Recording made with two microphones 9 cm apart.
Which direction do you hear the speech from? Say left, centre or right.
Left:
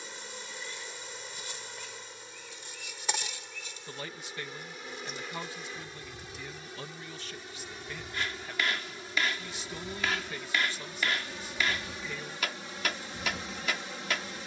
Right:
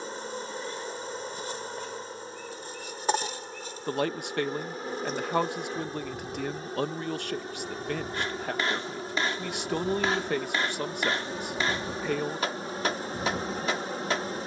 right.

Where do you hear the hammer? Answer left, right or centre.
right.